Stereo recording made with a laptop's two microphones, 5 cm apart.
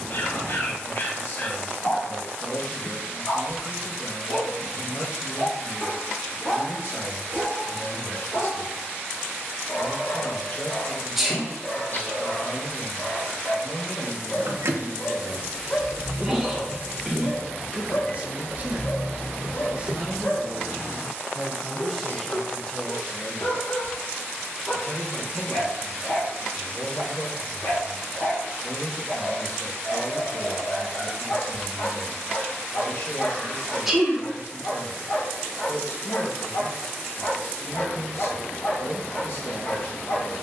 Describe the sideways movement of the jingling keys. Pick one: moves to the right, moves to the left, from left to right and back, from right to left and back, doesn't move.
from right to left and back.